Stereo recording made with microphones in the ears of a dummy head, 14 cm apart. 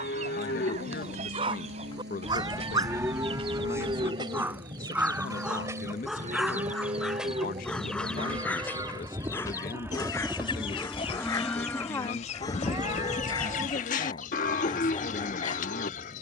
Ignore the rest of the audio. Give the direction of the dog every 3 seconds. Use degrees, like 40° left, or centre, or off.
30° right, 10° right, 10° left, 20° left, 30° left, 30° left.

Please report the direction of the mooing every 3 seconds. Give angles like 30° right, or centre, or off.
40° left, 20° right, 30° right, 10° right, 40° left, 50° left.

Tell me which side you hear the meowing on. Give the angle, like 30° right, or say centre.
20° right.